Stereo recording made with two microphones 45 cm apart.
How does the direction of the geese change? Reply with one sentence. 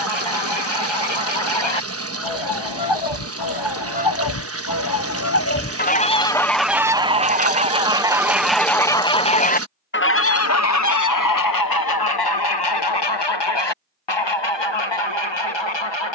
In this clip you hear the geese go right and come back.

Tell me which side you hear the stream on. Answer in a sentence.
You can hear the stream on the right.